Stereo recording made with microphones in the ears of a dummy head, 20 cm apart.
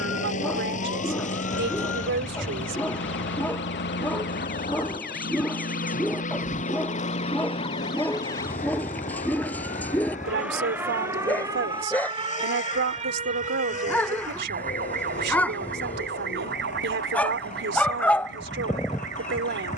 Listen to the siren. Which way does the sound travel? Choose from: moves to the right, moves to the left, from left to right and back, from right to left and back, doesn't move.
moves to the right.